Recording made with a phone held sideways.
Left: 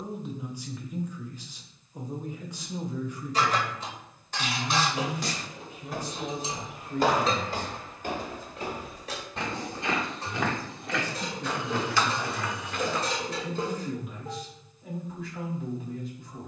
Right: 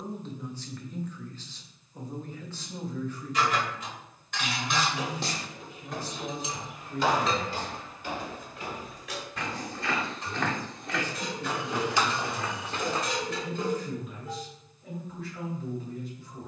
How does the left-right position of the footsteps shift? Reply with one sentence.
In this clip you hear the footsteps go left and come back.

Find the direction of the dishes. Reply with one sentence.
You can hear the dishes on the left.